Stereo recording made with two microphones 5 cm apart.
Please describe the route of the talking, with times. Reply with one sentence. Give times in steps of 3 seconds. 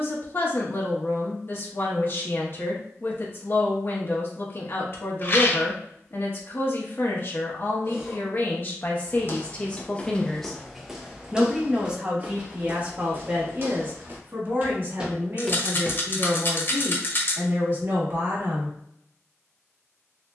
You can hear the talking on the left from 0 s, in the centre from 9 s and on the right from 12 s.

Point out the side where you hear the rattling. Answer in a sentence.
You can hear the rattling on the left.